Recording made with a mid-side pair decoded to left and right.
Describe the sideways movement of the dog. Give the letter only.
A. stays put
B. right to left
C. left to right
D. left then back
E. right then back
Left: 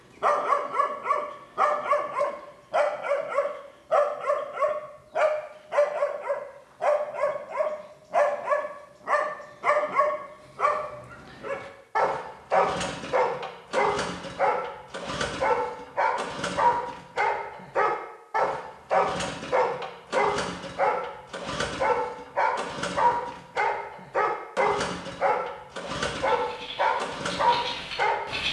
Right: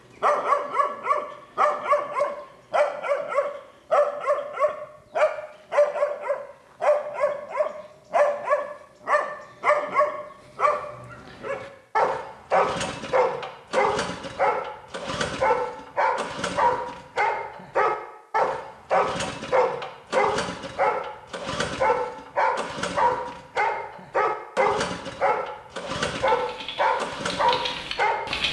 A.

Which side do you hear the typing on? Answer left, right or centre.
right.